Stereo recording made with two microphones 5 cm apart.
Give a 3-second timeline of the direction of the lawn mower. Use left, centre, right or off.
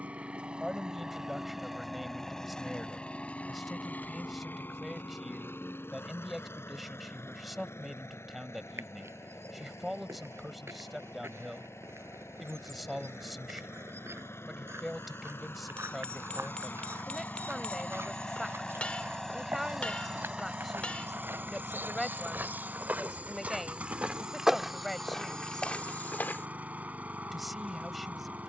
centre, left, left, left, left, left, centre, right, right, right.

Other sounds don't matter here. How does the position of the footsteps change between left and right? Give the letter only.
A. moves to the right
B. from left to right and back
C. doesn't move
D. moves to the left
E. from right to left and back
D.